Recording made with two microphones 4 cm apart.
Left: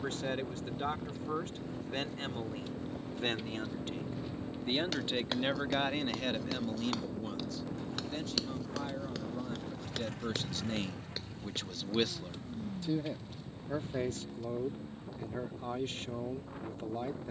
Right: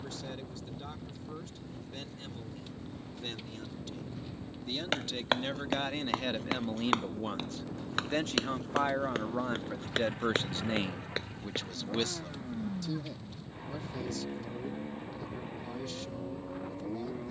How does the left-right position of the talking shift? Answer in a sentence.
In this clip you hear the talking move from left to right and back again.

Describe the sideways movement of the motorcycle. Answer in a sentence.
In this clip you hear the motorcycle move to the right.